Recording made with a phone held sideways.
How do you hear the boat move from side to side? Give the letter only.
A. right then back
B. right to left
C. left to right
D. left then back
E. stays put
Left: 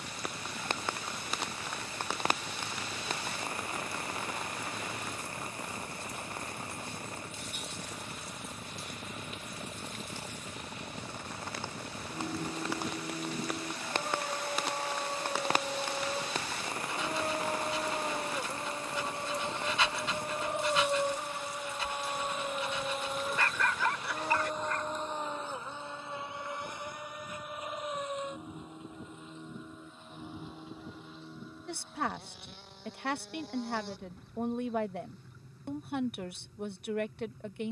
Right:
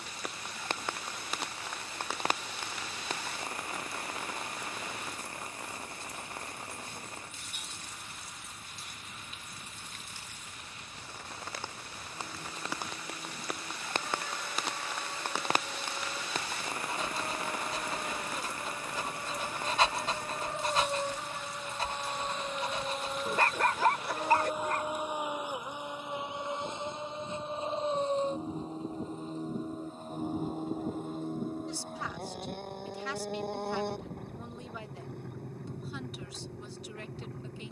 C.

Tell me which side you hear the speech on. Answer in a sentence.
In this clip you hear the speech on the left.